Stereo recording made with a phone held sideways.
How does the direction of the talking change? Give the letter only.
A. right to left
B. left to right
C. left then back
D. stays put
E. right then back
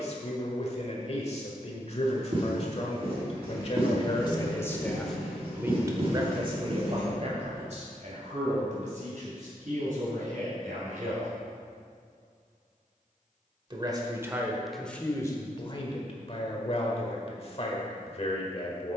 E.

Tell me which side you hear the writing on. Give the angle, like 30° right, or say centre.
40° right.